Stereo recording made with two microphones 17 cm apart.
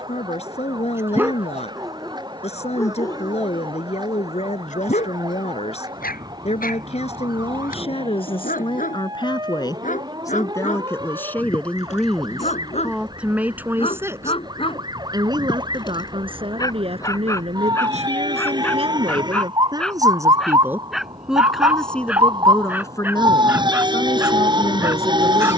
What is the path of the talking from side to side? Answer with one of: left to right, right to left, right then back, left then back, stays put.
right then back.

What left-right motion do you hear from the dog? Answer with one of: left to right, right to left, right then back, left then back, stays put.
left then back.